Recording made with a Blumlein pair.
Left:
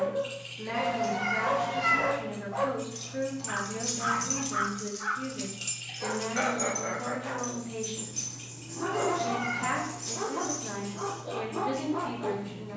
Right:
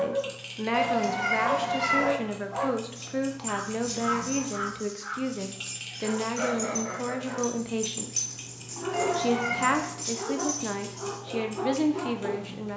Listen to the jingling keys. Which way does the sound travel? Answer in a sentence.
In this clip you hear the jingling keys go from the left side to the right.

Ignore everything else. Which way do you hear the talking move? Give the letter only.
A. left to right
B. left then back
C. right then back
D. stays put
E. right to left
D.